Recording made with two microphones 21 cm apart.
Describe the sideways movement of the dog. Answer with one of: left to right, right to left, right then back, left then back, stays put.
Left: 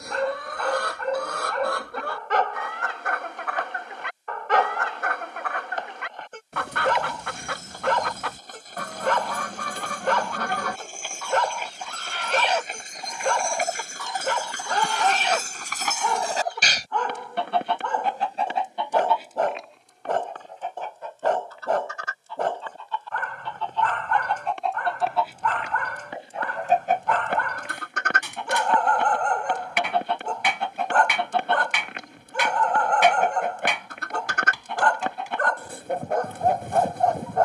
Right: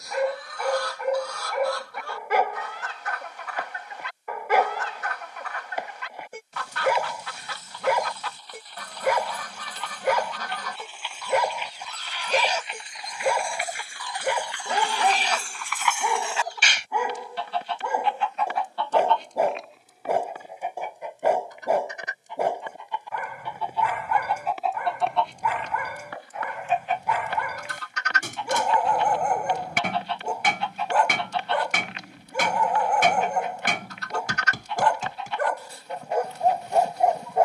stays put.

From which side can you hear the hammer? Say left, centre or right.
right.